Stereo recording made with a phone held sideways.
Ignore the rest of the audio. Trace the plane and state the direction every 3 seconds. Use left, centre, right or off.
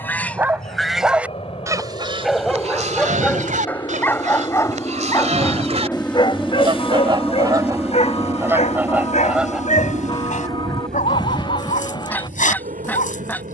left, left, centre, right, right.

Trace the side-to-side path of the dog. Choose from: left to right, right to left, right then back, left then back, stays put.
right to left.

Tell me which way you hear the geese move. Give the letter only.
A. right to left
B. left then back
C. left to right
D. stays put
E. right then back
E.